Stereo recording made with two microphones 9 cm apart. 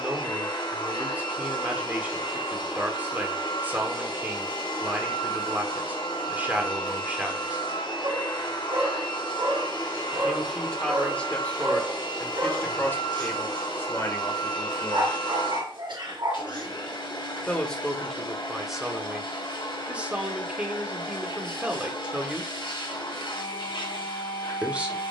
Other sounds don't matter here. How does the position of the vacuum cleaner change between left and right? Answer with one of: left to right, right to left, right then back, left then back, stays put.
stays put.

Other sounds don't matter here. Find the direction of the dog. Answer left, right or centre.
right.